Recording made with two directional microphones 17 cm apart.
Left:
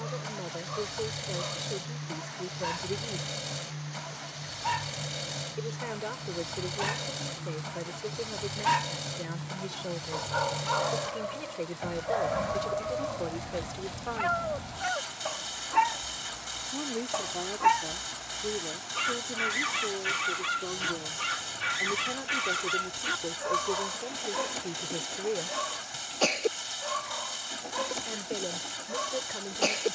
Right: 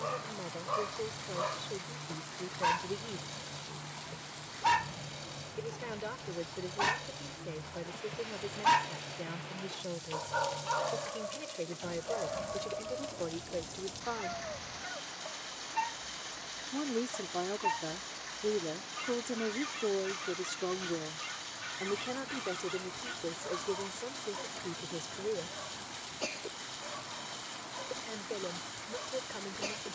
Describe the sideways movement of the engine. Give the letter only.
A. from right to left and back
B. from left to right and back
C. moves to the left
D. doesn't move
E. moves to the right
D.